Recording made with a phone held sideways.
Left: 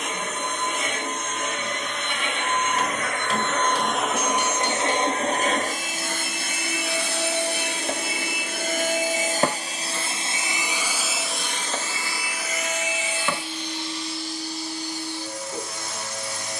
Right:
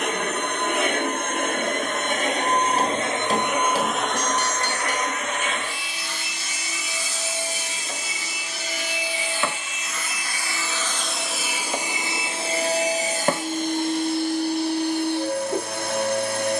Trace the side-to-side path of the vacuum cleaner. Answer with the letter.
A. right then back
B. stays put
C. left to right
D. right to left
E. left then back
E.